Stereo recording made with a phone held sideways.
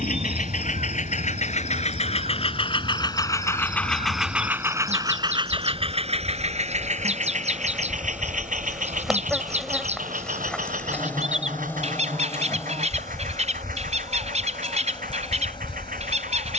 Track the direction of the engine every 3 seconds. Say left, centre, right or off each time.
left, centre, right, right, right, right.